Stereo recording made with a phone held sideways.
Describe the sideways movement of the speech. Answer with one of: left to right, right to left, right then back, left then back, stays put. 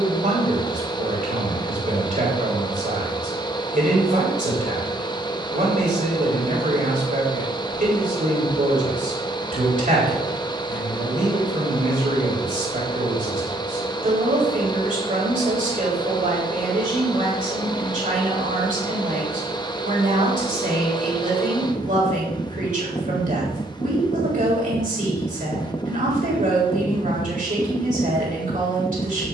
stays put.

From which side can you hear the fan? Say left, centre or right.
left.